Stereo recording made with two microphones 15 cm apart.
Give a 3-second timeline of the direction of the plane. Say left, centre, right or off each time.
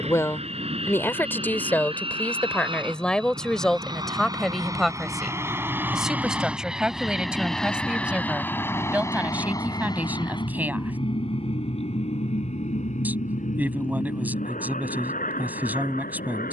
right, right, centre, left, left, left.